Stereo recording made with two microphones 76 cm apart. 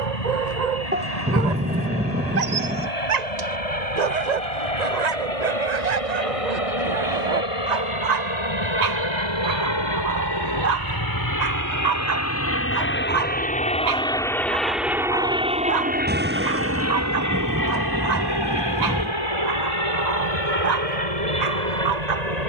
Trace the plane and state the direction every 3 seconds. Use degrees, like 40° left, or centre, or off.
60° left, 50° left, 50° left, 30° left, 10° left, 20° right, 40° right, 50° right.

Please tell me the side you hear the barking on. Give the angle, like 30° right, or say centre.
60° right.